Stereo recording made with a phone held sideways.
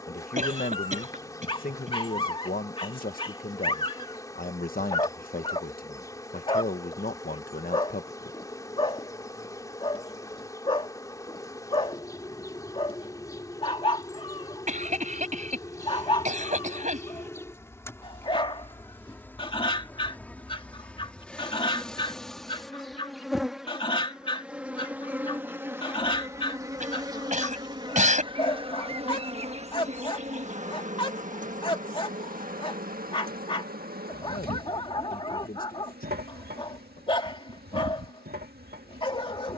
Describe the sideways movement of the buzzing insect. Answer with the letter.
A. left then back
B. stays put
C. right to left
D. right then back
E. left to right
E.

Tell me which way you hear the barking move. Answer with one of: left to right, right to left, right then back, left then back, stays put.
stays put.